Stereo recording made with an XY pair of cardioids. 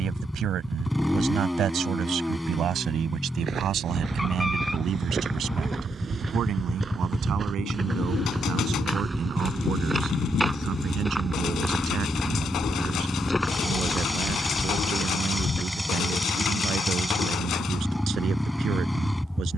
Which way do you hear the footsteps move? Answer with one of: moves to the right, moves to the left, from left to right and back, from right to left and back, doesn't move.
moves to the left.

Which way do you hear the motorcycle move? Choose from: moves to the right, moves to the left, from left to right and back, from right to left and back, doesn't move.
doesn't move.